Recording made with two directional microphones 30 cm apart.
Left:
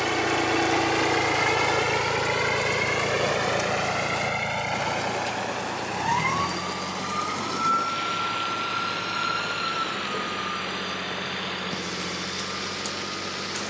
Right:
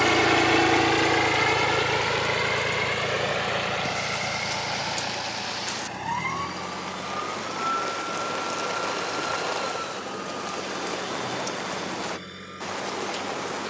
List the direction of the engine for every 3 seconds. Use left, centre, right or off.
centre, left, left, left, left.